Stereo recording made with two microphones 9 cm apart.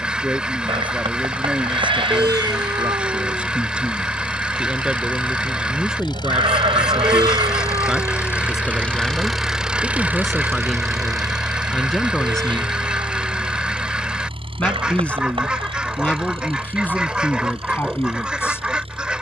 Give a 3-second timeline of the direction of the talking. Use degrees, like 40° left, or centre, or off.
10° right, 10° right, centre, centre, 10° left, 20° left, 30° left.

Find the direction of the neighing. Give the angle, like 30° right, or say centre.
70° right.